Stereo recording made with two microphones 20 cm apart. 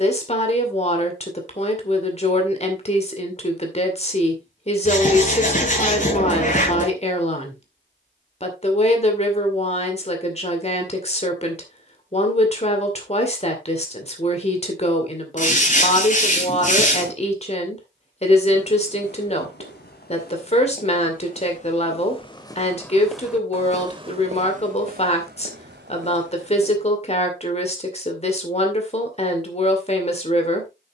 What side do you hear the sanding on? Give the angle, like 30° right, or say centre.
40° left.